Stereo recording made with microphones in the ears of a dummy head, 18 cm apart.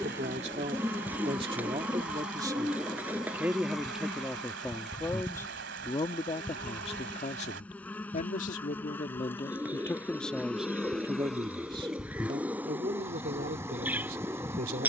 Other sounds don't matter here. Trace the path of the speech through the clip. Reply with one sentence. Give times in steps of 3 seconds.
You can hear the speech on the right from 0 s, in the centre from 3 s, on the left from 6 s, in the centre from 9 s and on the right from 12 s.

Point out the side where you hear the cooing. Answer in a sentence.
You can hear the cooing in the centre.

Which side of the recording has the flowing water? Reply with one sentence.
In this clip you hear the flowing water on the right.